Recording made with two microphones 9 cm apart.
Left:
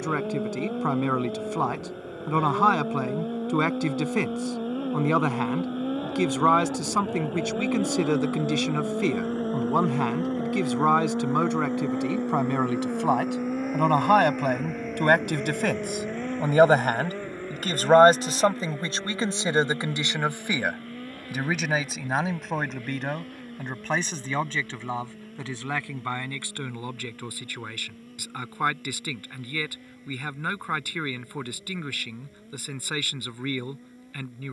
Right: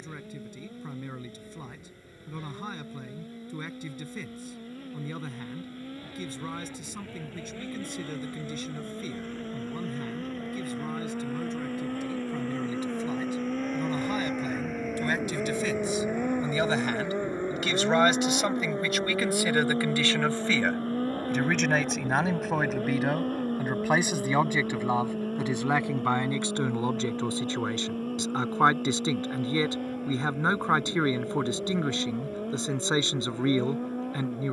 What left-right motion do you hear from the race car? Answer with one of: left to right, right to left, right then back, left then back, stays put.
left to right.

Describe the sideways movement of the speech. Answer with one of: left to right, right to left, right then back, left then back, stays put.
left to right.